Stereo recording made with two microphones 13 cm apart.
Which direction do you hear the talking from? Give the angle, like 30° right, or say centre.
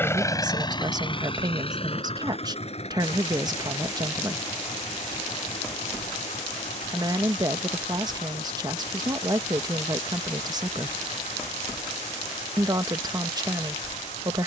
30° right.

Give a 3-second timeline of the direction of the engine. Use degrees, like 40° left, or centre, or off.
40° left, 60° left, 60° left, 60° left, 60° left.